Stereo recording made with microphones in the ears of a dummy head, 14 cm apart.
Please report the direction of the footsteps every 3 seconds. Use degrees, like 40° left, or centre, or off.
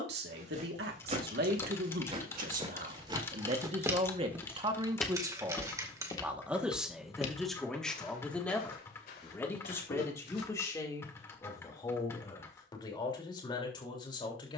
40° right, 10° right, 50° left, 70° left, off.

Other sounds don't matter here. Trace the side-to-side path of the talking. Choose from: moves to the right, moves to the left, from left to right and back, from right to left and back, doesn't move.
moves to the left.